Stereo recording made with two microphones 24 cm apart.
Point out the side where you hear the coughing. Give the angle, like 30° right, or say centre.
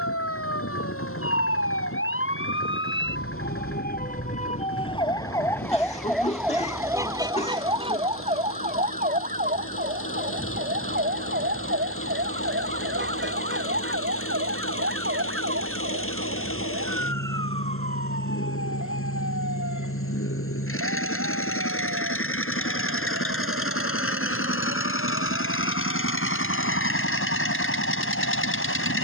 30° left.